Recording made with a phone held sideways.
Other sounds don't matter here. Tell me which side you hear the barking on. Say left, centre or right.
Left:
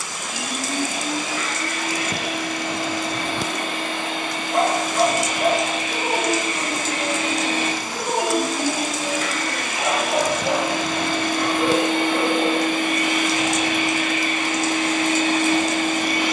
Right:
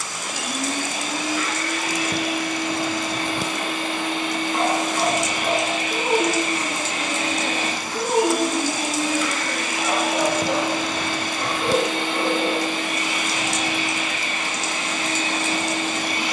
left.